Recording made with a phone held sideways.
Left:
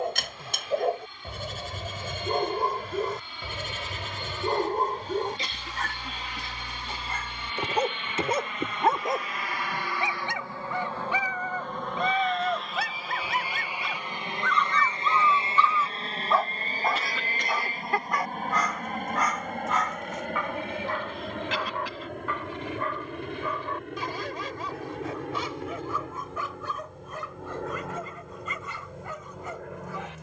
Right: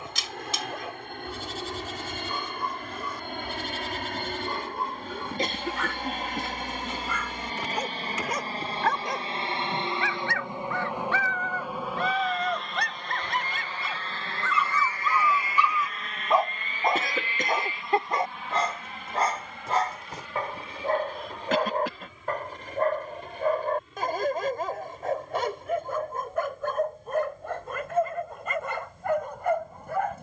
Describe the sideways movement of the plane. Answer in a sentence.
In this clip you hear the plane travel towards the left.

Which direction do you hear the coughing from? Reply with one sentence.
You can hear the coughing on the right.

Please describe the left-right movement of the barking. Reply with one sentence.
In this clip you hear the barking move from left to right.